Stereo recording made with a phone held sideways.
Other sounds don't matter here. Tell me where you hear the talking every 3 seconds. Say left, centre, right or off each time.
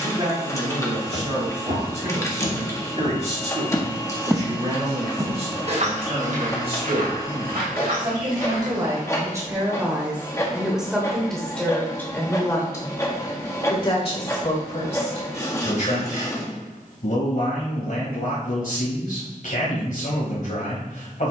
right, right, right, centre, left, left, left.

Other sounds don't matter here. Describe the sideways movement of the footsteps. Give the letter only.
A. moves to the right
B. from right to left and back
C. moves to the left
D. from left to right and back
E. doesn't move
A.